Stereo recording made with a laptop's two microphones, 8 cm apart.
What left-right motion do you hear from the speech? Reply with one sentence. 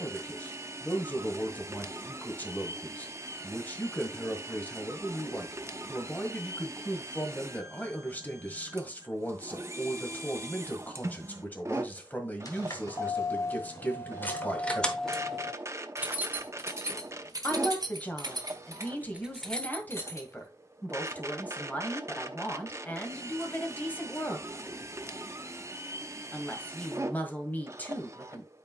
In this clip you hear the speech stay put.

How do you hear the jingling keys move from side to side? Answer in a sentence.
In this clip you hear the jingling keys move from left to right and back again.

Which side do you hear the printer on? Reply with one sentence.
In this clip you hear the printer on the right.